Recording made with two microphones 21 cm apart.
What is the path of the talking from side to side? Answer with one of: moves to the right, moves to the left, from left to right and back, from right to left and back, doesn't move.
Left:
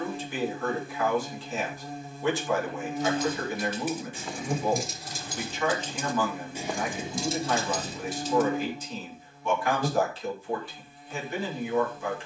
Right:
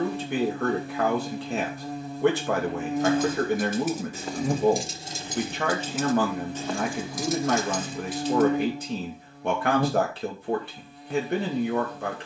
doesn't move.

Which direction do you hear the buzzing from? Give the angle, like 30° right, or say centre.
70° right.